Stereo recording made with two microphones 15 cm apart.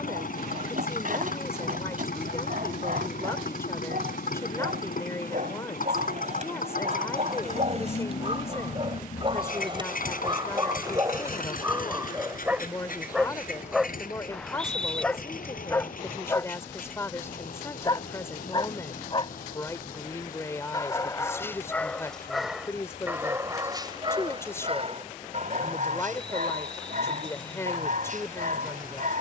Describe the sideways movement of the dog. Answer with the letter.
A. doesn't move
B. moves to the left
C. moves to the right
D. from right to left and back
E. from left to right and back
D.